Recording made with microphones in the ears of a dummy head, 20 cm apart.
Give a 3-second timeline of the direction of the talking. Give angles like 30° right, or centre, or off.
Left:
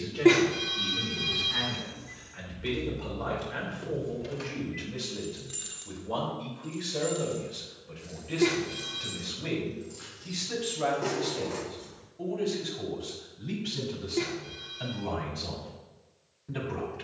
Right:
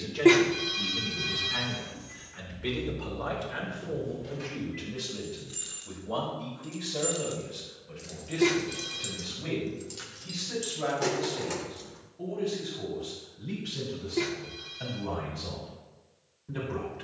20° right, centre, 10° left, 20° left, 20° left, 30° left.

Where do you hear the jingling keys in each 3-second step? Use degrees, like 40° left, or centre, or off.
50° left, 20° left, 40° right, 80° right, off, off.